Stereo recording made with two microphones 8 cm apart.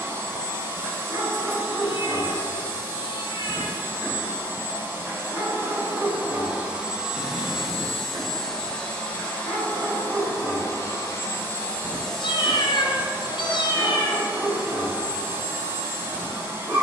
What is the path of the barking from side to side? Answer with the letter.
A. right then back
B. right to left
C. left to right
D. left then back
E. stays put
E.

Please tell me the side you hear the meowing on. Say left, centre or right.
left.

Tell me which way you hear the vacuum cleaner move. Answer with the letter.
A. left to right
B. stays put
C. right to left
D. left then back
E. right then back
D.